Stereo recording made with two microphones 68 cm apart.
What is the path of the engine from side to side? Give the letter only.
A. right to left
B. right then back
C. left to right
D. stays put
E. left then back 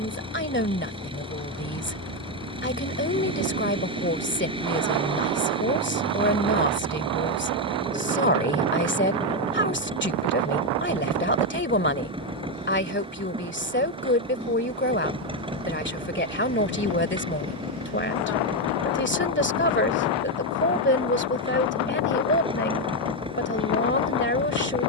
D.